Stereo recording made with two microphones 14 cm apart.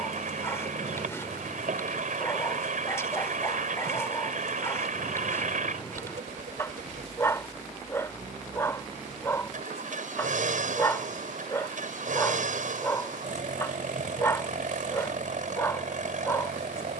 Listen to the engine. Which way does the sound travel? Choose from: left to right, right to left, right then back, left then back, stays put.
stays put.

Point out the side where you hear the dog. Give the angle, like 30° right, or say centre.
20° left.